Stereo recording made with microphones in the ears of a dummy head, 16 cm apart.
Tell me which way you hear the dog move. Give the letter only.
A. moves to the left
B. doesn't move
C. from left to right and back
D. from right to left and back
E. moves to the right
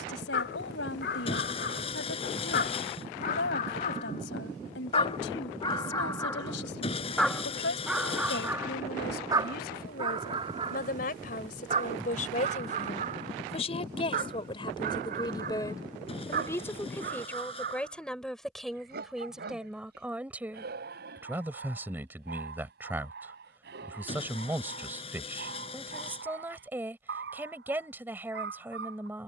E.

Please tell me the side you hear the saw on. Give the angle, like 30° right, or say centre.
30° left.